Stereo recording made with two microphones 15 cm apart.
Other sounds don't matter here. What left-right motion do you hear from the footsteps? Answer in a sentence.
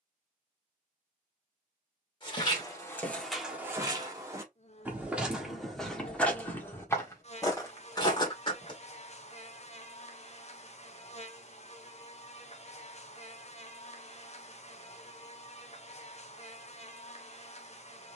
You can hear the footsteps move from left to right and back again.